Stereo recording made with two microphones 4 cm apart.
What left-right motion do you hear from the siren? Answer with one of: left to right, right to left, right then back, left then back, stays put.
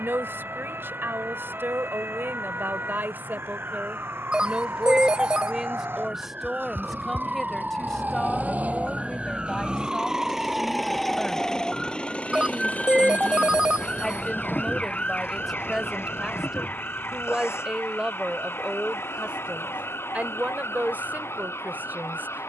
right to left.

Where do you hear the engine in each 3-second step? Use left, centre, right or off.
right, right, right, centre, left, left, left, left.